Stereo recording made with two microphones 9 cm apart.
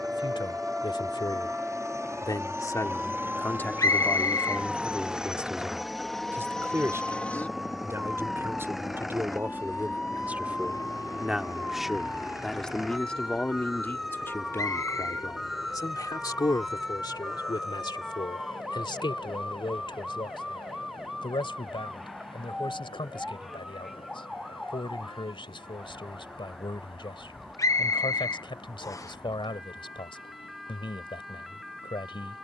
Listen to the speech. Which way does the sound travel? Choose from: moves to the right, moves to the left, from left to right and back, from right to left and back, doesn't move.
from left to right and back.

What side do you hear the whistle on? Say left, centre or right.
left.